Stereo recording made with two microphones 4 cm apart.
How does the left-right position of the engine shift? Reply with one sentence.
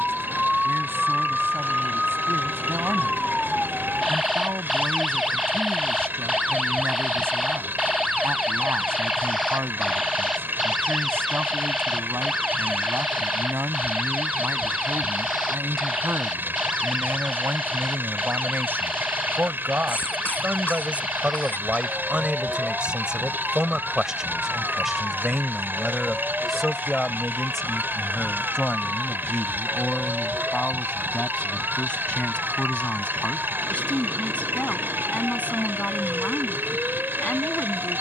In this clip you hear the engine stay put.